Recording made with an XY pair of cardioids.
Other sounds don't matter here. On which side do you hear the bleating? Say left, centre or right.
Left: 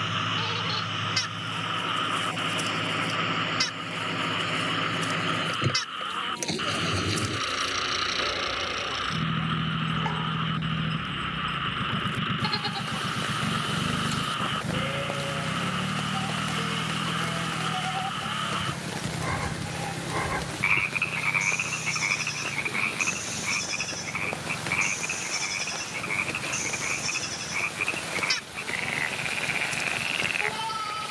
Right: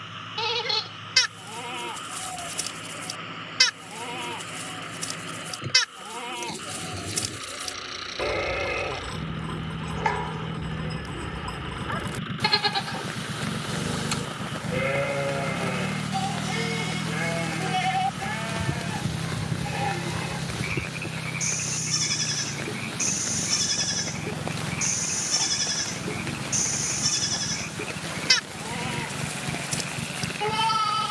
right.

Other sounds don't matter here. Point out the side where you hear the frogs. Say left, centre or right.
left.